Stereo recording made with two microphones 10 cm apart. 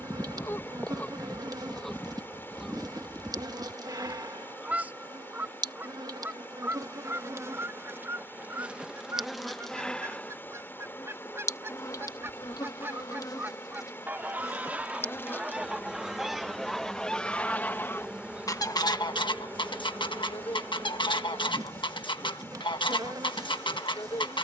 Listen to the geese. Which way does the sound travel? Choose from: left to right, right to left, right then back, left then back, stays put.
right then back.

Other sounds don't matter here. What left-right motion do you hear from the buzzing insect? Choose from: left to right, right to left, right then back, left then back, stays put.
left then back.